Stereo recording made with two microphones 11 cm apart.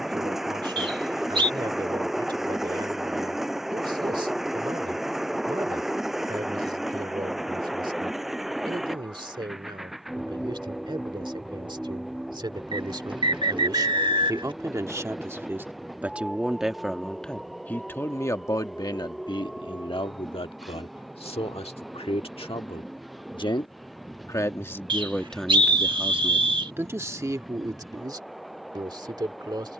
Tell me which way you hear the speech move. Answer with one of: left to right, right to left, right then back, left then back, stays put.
left then back.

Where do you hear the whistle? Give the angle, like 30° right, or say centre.
50° right.